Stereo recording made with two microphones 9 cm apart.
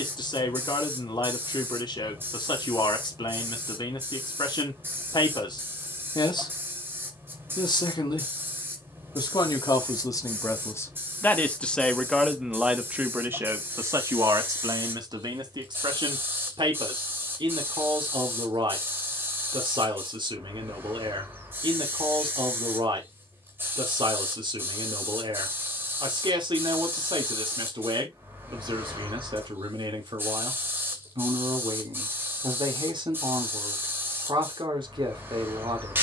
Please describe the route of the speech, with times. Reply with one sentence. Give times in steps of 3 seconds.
In this clip you hear the speech on the left from 0 s and on the right from 12 s.